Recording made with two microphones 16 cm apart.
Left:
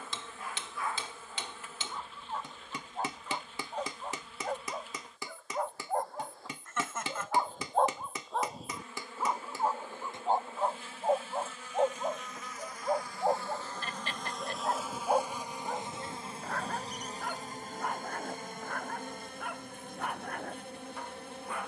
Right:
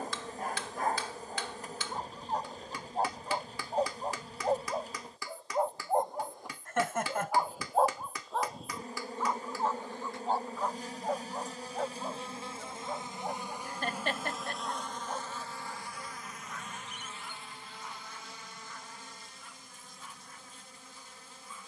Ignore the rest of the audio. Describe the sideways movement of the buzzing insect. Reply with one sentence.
In this clip you hear the buzzing insect move from right to left.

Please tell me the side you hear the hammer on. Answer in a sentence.
You can hear the hammer on the left.